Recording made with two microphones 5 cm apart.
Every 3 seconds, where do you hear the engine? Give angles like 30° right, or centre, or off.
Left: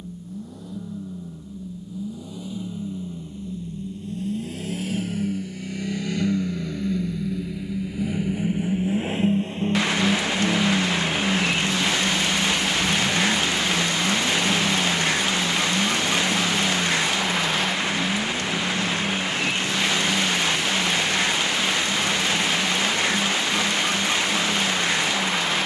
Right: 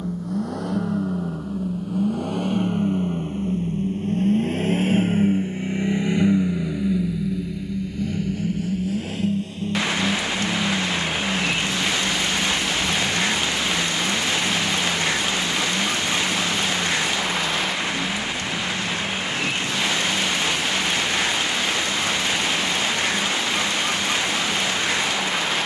70° right, 40° right, centre, 40° left, 60° left, 60° left, 70° left, 70° left, 70° left.